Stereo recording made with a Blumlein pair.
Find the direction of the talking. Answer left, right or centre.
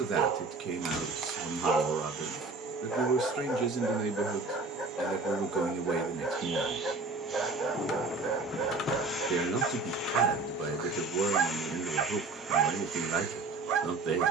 right.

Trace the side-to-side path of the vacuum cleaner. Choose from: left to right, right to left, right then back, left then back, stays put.
left then back.